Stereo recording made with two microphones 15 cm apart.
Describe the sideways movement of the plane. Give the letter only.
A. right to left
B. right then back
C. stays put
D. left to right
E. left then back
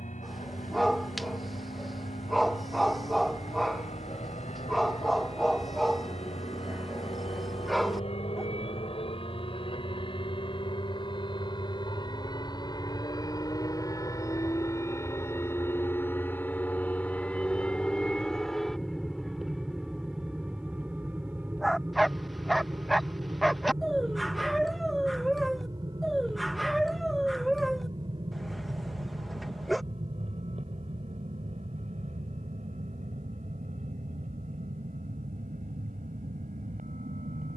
D.